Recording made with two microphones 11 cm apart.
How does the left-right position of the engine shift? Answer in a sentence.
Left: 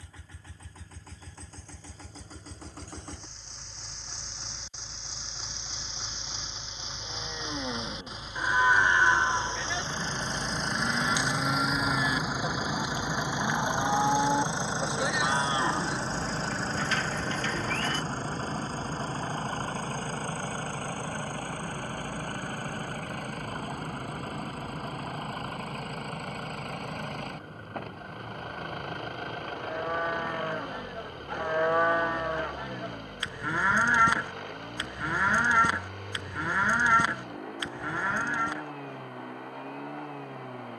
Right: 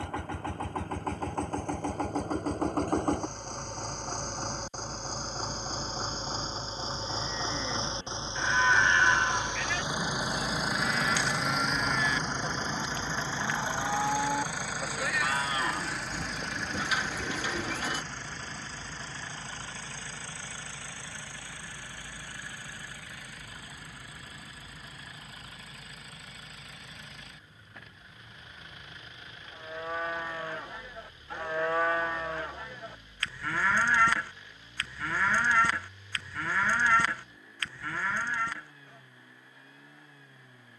You can hear the engine go from the right side to the left.